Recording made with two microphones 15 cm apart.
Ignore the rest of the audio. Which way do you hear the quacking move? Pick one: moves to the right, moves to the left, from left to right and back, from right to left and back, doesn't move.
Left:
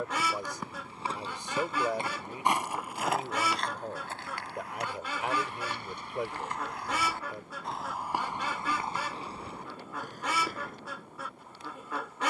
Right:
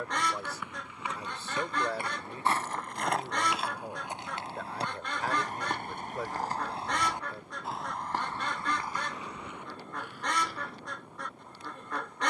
doesn't move.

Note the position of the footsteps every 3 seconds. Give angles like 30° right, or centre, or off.
20° left, 20° right, 10° right, 40° left.